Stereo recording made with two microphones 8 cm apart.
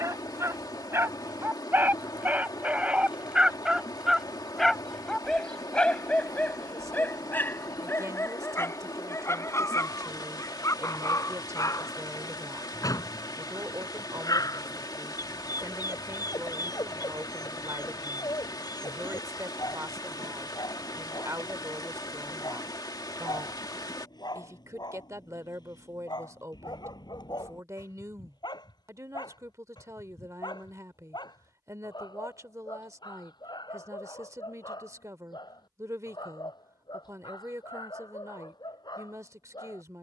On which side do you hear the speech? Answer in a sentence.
In this clip you hear the speech on the right.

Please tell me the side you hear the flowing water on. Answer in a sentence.
You can hear the flowing water on the left.